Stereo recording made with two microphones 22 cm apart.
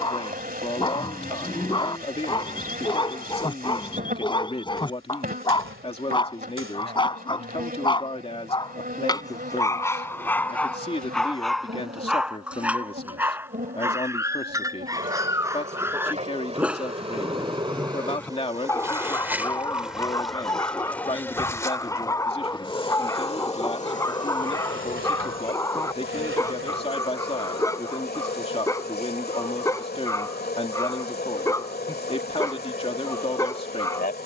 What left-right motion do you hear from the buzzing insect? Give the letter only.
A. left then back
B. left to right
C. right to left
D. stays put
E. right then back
C.